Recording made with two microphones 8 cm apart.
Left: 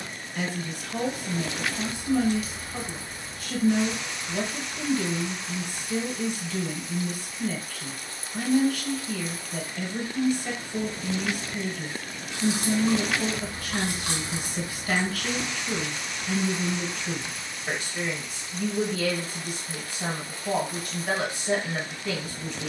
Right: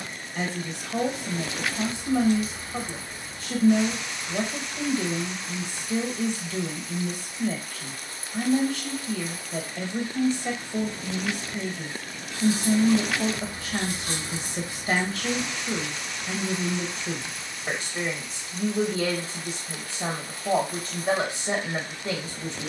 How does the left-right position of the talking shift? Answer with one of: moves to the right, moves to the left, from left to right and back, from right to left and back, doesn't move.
doesn't move.